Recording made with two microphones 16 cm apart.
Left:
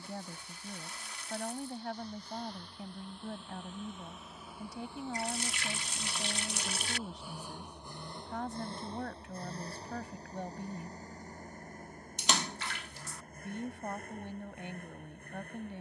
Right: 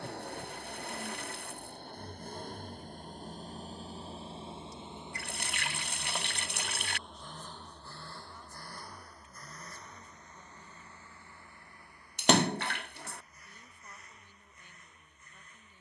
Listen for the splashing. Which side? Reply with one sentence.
You can hear the splashing on the right.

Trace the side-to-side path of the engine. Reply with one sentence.
In this clip you hear the engine go from the right side to the left.